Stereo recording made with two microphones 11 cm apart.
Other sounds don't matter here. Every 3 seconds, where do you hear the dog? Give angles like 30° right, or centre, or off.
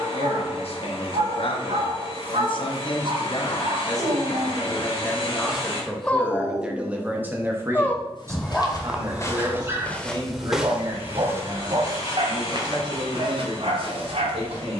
70° right, 40° right, 20° left, 30° right, 60° right.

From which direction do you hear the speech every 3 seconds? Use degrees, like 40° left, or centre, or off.
60° left, 20° left, 20° right, 40° right, 50° right.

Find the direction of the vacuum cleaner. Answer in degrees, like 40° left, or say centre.
50° left.